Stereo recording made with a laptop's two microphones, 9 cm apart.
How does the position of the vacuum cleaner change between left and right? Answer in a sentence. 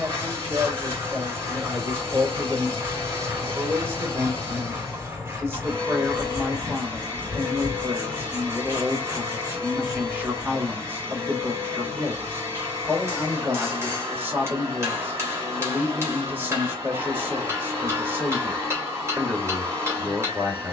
You can hear the vacuum cleaner stay in one place.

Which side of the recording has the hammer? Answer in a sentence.
In this clip you hear the hammer on the right.